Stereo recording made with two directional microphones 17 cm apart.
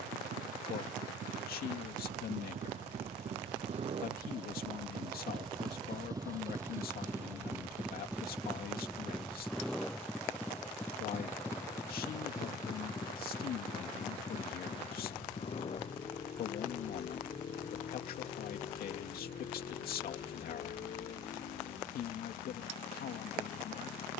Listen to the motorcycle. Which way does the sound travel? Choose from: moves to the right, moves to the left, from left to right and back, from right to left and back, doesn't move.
moves to the left.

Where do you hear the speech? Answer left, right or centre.
left.